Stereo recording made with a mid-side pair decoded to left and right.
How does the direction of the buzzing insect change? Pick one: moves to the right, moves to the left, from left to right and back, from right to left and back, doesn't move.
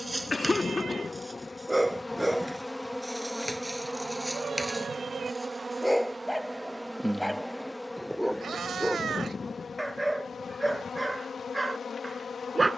from left to right and back.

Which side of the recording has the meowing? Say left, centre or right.
right.